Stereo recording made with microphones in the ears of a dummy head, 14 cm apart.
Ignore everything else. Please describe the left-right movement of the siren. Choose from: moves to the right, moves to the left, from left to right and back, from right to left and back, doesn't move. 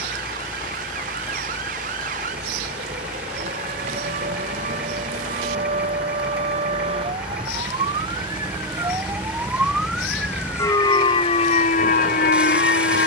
moves to the left.